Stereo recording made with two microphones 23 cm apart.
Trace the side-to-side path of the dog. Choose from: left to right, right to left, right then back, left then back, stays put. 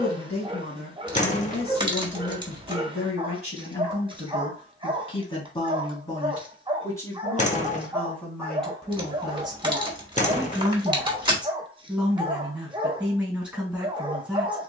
stays put.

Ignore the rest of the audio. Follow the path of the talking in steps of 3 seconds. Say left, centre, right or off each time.
left, left, centre, centre, centre.